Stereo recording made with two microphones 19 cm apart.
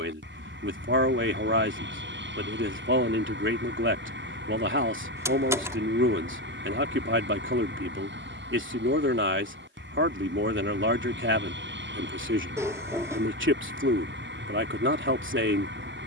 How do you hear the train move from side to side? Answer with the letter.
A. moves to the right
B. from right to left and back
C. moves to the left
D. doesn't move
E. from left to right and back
D.